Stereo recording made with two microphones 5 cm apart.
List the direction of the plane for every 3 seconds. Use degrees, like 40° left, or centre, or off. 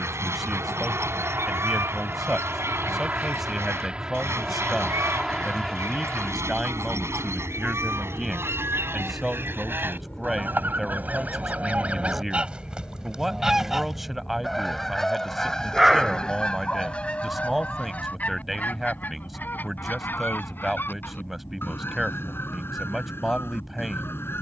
40° right, 10° right, 10° left, 30° left, 40° left, 40° left, 50° left, 50° left.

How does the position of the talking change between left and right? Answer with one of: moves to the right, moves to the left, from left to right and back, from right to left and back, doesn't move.
doesn't move.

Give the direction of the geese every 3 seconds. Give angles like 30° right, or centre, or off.
60° right, 60° right, 60° right, 40° right, 10° right, 20° left, 40° left, 50° left.